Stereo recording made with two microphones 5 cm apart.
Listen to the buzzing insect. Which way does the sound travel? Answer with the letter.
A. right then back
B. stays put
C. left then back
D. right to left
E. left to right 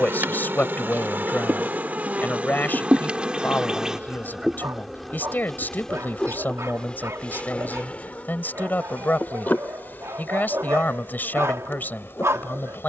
D.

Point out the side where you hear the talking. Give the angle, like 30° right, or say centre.
40° left.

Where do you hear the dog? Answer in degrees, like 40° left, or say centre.
80° right.